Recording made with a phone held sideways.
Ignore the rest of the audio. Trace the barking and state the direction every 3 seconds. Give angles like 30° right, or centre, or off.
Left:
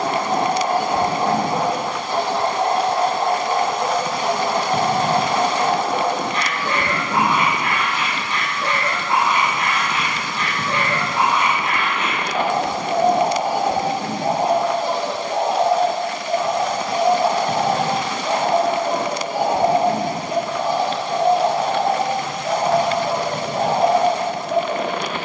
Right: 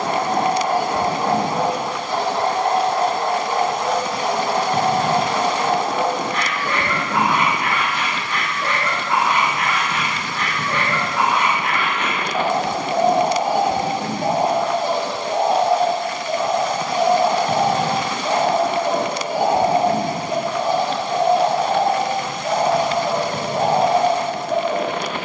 20° left, 20° left, 20° left, 20° left, 20° left, 10° left, 10° right, 10° right, 10° right.